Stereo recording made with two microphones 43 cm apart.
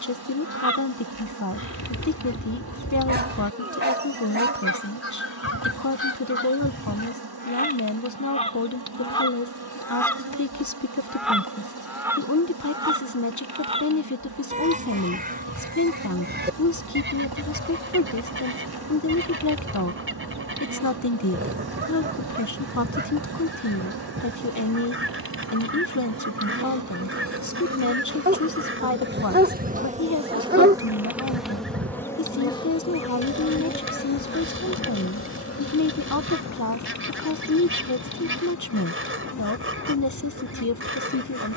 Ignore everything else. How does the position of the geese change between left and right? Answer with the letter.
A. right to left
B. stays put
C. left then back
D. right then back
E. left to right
E.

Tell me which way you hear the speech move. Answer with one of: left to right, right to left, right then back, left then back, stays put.
stays put.